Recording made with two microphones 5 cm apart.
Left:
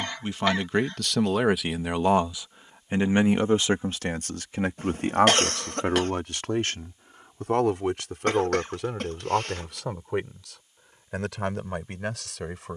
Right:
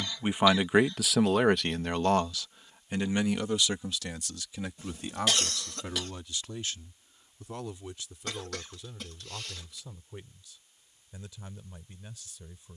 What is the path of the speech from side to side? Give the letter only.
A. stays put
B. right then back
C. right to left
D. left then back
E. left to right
C.